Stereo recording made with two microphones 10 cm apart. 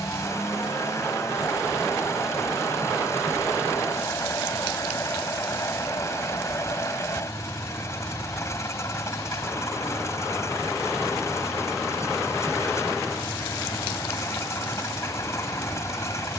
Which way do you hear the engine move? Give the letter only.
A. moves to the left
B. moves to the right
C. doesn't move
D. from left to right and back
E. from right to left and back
C.